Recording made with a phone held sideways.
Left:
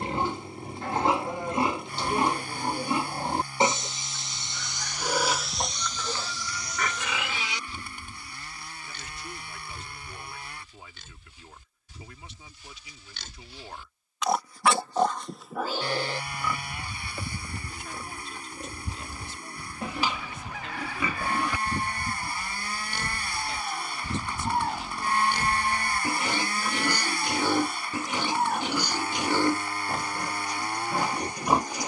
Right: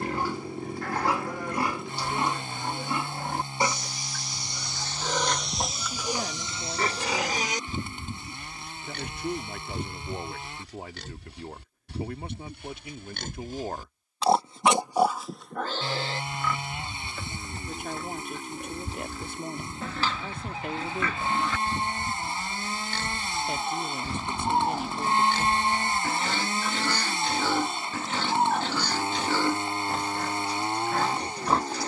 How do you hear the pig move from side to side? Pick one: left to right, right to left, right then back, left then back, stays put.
right then back.